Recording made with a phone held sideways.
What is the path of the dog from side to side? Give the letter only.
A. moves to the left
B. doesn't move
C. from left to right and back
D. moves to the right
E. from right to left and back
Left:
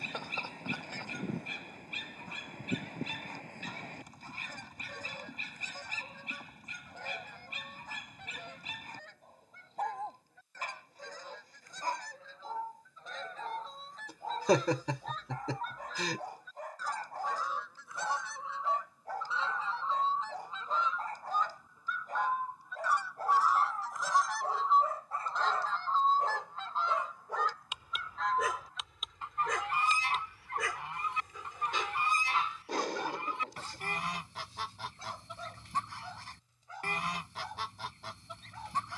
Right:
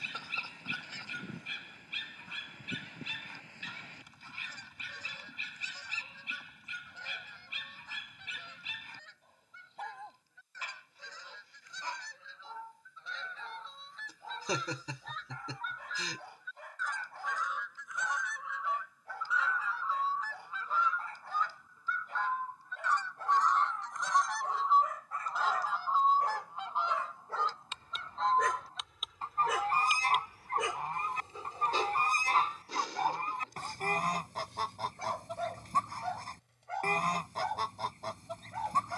D.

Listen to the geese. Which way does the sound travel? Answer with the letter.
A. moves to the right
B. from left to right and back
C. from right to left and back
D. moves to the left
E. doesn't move
A.